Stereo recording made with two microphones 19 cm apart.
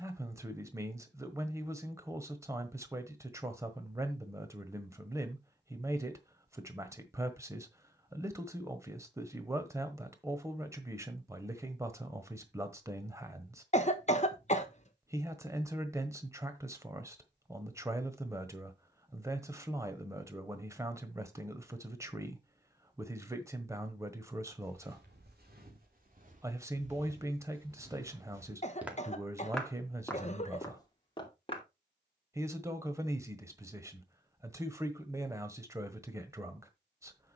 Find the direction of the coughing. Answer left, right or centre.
left.